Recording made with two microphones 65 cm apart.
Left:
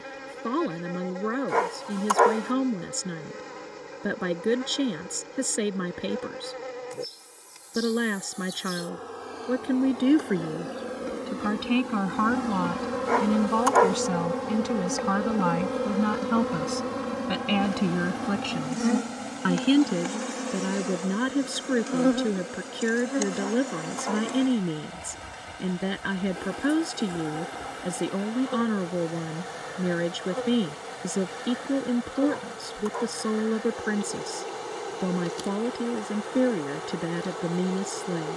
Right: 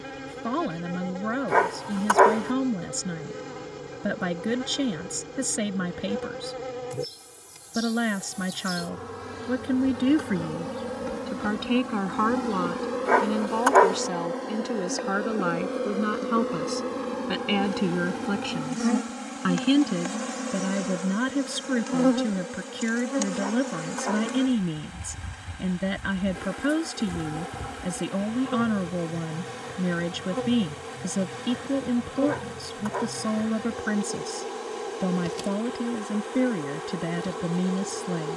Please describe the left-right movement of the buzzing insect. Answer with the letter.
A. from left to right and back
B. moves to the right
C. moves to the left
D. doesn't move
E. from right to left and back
E.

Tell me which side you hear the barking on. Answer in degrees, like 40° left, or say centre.
70° right.